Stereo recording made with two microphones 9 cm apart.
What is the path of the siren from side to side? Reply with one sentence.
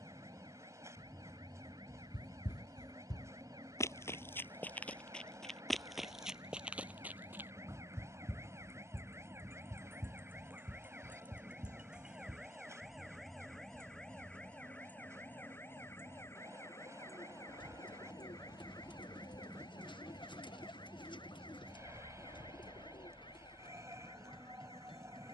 In this clip you hear the siren go from the right side to the left.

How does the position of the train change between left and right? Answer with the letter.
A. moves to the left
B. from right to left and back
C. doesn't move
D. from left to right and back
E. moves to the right
C.